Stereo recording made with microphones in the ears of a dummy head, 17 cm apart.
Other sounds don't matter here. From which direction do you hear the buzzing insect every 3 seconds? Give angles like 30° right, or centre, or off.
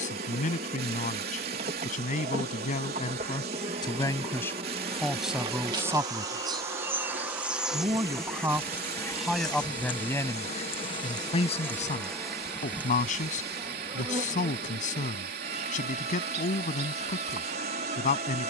40° right, 30° right, 10° right, 20° left, 20° right, 30° right.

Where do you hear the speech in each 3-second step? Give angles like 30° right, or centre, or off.
40° left, 10° left, 20° right, 20° left, 40° left, 40° left.